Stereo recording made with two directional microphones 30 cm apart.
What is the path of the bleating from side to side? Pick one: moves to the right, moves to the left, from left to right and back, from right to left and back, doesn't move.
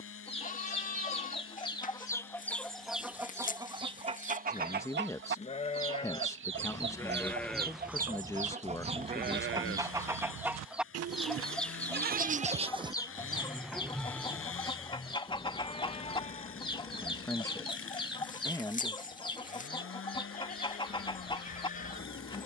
from left to right and back.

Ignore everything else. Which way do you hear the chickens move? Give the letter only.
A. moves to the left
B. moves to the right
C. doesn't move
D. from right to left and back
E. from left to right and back
E.